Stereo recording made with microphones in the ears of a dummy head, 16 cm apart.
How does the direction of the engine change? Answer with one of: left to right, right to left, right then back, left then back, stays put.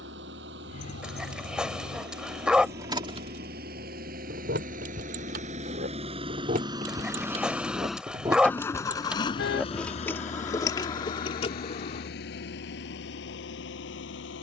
right to left.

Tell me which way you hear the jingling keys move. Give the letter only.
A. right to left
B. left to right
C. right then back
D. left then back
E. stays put
C.